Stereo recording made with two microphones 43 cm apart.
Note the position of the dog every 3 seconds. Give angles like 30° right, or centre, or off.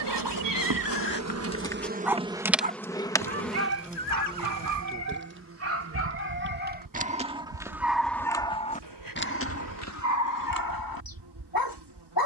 20° left, 40° right, 10° right, 40° left.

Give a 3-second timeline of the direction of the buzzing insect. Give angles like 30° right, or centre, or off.
30° right, 10° right, 50° right, 70° right.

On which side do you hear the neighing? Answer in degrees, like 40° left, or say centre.
70° right.